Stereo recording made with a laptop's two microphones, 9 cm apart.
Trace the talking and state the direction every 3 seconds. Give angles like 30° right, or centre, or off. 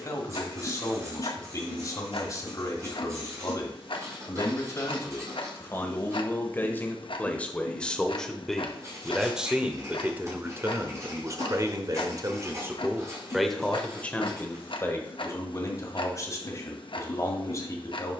40° left, 30° left, 10° left, 20° right, centre, 40° left.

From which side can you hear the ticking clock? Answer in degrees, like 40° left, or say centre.
60° left.